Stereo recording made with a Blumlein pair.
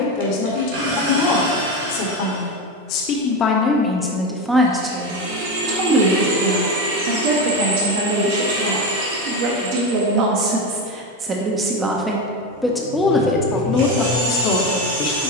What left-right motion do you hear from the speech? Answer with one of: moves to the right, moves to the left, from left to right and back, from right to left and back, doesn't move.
from left to right and back.